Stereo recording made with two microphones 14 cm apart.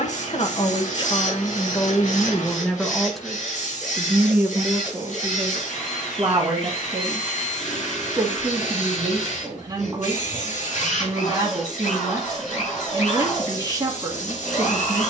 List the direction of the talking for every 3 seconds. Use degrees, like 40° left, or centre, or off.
30° left, 10° right, 30° right, 30° right, 30° right.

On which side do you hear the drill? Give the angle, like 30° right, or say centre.
60° left.